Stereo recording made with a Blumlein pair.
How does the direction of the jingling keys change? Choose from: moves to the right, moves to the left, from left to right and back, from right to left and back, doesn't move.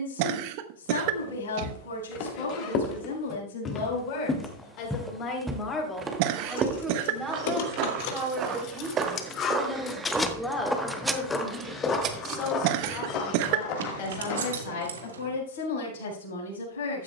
moves to the right.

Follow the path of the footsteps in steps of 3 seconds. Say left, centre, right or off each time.
left, centre, right, centre, left, off.